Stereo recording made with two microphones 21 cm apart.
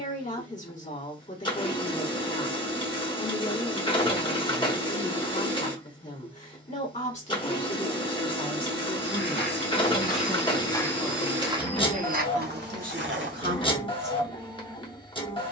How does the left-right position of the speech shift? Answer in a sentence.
You can hear the speech go from the left side to the right.